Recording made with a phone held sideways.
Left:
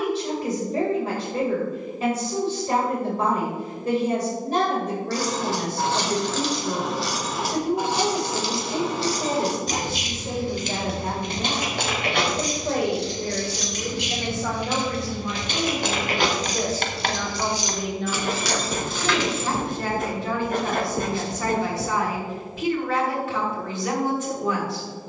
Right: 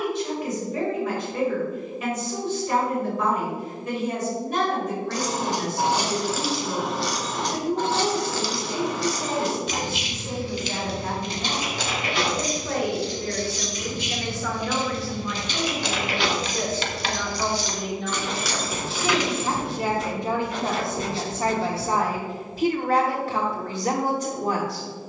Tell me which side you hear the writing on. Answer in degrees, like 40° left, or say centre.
50° left.